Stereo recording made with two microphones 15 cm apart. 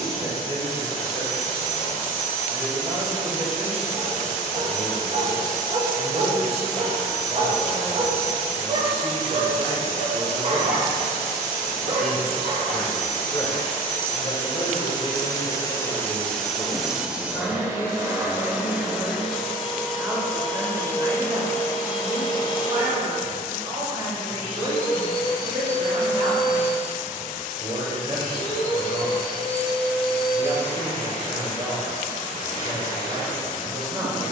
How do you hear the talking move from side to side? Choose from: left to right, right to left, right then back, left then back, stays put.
left then back.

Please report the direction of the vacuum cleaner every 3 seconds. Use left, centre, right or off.
left, left, left, left, left, centre, centre, left, left, left, left, left.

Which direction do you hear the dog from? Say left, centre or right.
right.